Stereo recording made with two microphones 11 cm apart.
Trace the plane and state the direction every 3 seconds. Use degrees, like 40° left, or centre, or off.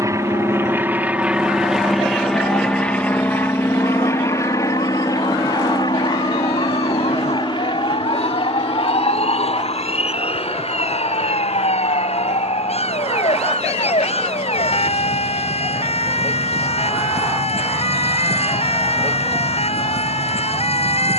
10° right, 30° left, 40° left, 50° left, 60° left, 60° left, 60° left.